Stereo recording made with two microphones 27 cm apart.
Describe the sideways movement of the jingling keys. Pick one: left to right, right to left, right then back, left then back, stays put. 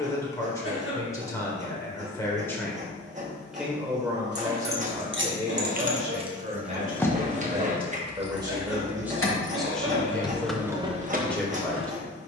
left then back.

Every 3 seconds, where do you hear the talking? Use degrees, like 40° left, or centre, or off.
10° left, 10° right, 20° right, centre.